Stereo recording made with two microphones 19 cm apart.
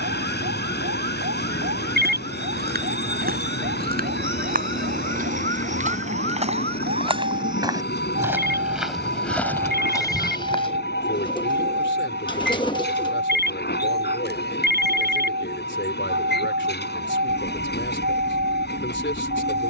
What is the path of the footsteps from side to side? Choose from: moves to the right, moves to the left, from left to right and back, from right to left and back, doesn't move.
moves to the left.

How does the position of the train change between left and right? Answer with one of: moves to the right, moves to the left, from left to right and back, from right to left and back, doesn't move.
doesn't move.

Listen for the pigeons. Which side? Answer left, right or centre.
left.